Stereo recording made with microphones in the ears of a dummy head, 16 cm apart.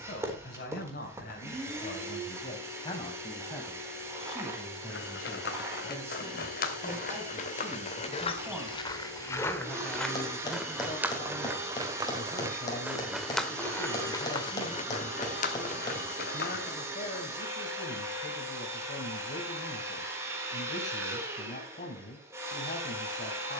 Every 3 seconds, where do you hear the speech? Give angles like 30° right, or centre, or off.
50° left, centre, 10° right, 30° left, 40° left, 40° left, 40° left, 40° left.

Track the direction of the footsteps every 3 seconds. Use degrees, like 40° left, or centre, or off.
off, 60° left, 40° left, centre, 10° left, 50° left, off, off.